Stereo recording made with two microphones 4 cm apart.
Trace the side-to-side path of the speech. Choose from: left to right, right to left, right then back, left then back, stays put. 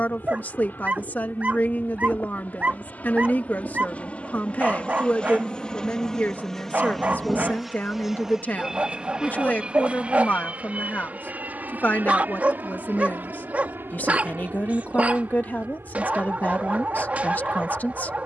stays put.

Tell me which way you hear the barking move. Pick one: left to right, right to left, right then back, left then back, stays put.
stays put.